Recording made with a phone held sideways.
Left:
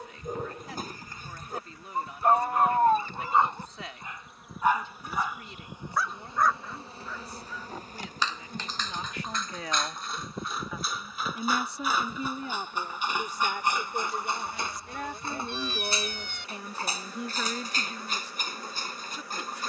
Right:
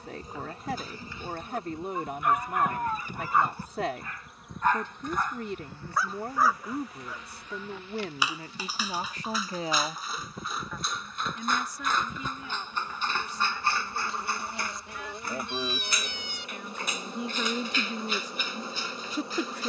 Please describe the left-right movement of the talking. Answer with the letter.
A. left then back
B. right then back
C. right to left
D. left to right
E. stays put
A.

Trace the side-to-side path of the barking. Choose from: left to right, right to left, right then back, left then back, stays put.
right then back.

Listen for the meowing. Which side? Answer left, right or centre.
left.